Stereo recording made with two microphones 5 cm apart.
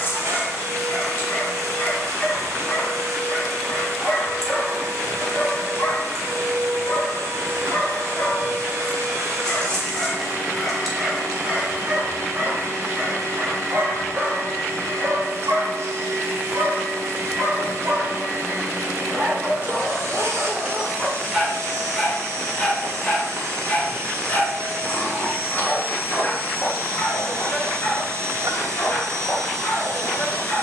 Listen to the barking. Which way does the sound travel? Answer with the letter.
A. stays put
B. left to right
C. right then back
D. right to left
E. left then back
C.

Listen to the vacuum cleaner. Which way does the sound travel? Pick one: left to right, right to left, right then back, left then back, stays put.
stays put.